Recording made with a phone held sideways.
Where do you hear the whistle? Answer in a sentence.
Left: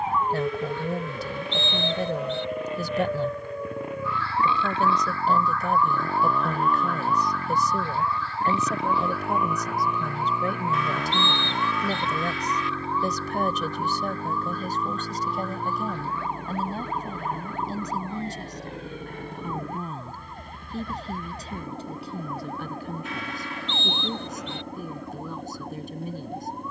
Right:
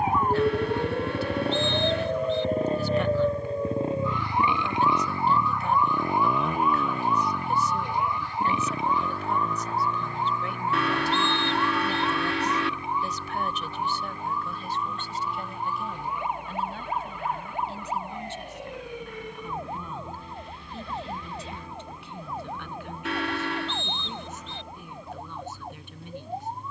You can hear the whistle on the left.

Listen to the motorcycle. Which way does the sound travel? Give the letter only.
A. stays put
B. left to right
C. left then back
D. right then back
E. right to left
E.